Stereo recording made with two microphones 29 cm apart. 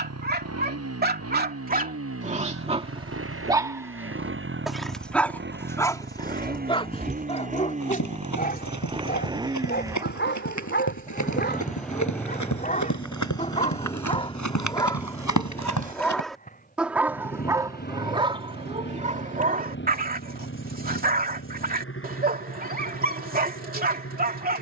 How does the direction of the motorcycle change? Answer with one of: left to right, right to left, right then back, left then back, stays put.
right to left.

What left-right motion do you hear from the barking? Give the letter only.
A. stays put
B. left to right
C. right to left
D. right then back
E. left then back
E.